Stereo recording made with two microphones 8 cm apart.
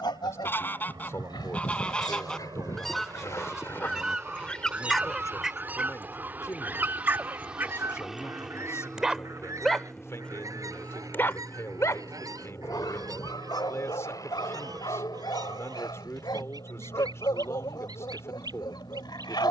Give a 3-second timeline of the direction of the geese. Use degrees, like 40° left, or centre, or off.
20° left, 10° right, 30° right, 40° right, 50° right, 50° right, 60° right.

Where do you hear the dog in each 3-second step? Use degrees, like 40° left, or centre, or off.
60° left, 20° left, 20° right, 20° left, 60° left, 70° left, 70° left.